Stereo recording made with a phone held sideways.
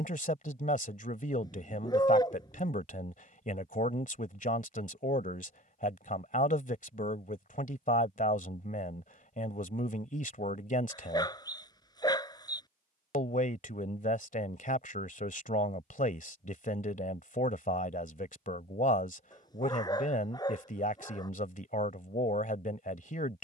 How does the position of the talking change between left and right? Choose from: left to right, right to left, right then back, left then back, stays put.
stays put.